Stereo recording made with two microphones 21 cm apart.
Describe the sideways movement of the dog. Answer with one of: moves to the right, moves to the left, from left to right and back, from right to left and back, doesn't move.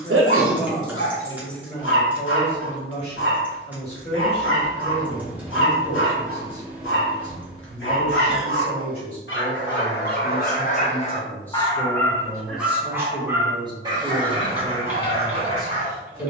moves to the right.